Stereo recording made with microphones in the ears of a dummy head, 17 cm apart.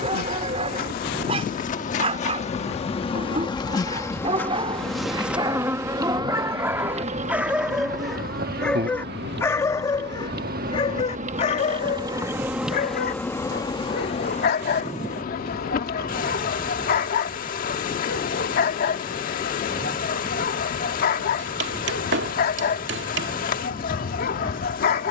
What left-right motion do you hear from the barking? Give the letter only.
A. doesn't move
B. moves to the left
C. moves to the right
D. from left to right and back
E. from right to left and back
B.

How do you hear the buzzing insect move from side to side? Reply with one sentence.
In this clip you hear the buzzing insect go right and come back.